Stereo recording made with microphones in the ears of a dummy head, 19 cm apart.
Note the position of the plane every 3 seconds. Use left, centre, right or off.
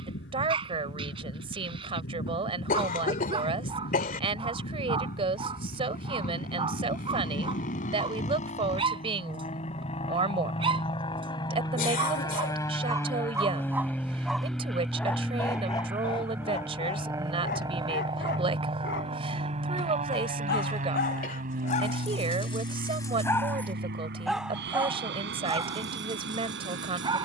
left, left, left, left, centre, centre, right, right, right.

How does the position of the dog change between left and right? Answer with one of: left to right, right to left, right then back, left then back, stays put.
left then back.